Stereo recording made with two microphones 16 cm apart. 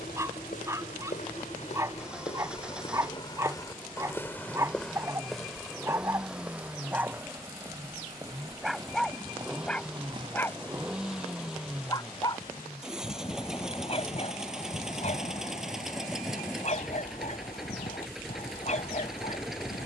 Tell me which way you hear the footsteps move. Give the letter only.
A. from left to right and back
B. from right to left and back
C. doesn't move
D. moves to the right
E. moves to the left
D.